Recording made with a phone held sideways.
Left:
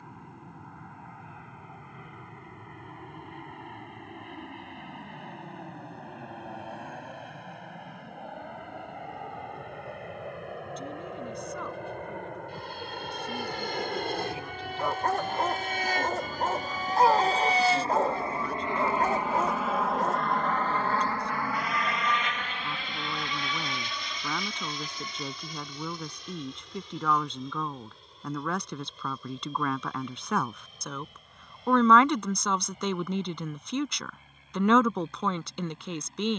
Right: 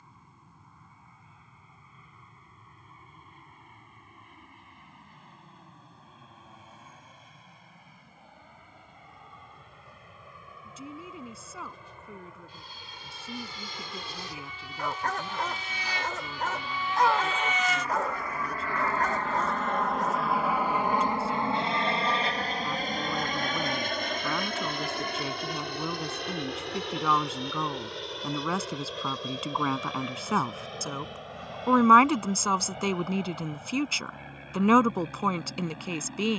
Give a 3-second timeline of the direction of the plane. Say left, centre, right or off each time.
left, left, left, left, left, left, centre, right, right, right, right, right.